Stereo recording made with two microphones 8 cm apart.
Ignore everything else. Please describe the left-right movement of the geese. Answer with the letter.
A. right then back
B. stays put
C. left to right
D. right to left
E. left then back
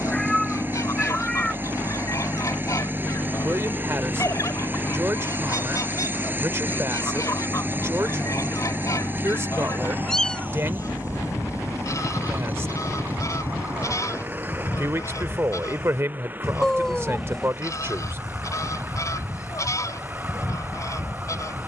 B.